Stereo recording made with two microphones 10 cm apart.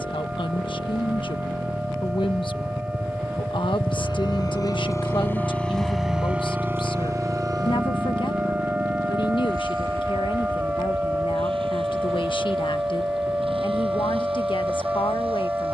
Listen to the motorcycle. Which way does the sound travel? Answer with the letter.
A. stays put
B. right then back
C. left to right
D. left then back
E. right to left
C.